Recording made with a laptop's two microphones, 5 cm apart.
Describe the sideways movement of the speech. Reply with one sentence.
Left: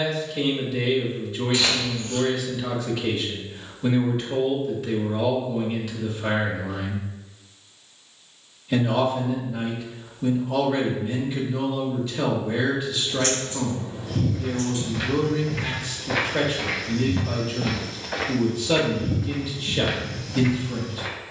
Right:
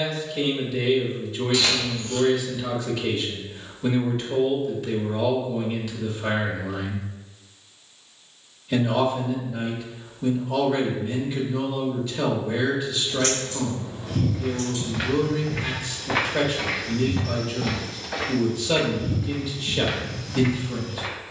You can hear the speech stay put.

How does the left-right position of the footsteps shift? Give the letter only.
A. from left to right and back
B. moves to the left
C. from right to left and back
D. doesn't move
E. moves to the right
C.